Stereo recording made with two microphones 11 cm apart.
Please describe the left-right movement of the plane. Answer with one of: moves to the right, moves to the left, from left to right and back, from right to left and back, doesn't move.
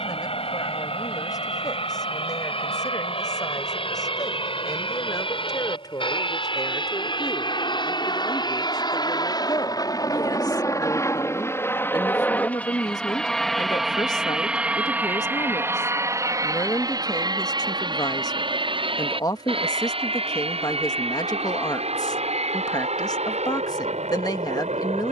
moves to the right.